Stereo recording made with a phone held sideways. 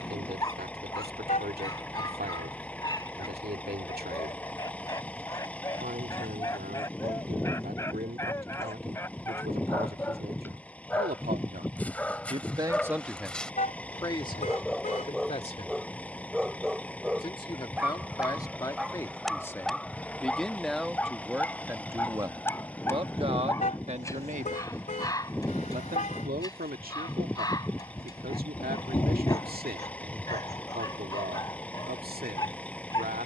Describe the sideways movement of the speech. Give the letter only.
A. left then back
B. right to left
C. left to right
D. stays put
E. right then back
A.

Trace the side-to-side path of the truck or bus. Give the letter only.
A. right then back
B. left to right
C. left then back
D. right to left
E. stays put
E.